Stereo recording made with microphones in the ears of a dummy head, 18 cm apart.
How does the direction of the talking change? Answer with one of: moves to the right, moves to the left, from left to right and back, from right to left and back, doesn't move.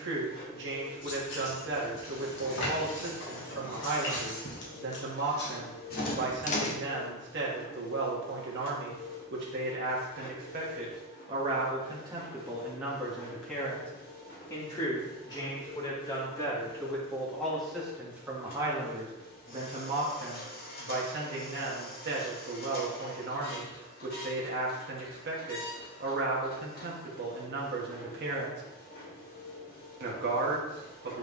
from right to left and back.